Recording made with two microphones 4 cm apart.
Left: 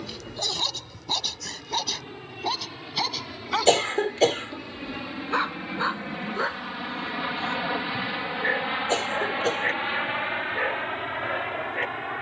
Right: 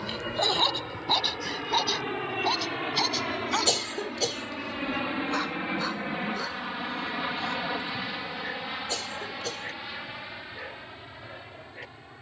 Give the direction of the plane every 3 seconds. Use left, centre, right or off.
right, right, centre, left.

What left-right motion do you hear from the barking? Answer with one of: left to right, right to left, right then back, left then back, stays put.
right to left.